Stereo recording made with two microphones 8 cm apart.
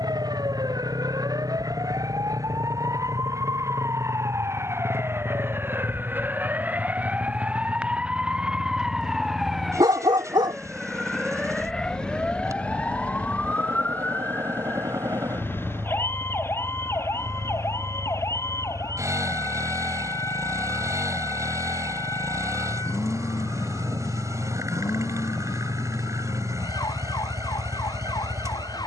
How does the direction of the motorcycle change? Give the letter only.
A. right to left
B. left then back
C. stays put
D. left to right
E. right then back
C.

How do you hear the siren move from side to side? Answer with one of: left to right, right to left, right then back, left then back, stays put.
right to left.